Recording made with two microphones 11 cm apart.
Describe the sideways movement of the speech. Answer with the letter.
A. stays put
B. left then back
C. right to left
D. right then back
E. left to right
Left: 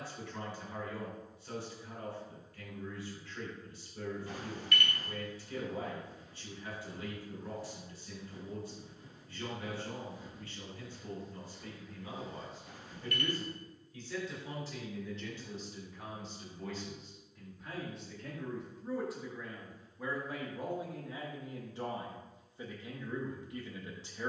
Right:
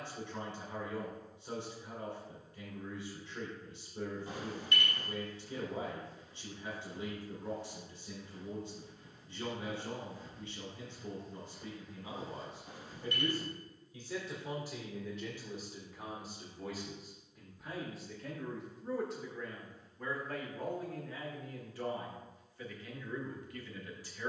C.